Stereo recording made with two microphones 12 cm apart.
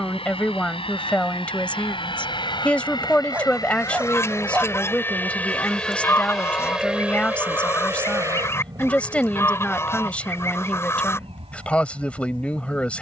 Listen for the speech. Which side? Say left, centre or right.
centre.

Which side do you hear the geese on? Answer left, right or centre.
left.